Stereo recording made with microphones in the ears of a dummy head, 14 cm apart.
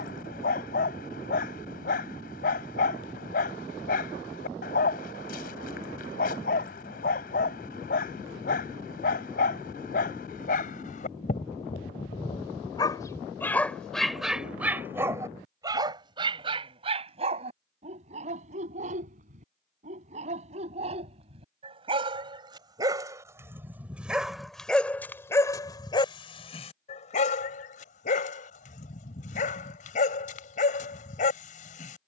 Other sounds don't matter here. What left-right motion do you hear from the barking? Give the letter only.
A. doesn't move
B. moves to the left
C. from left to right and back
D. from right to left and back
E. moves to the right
C.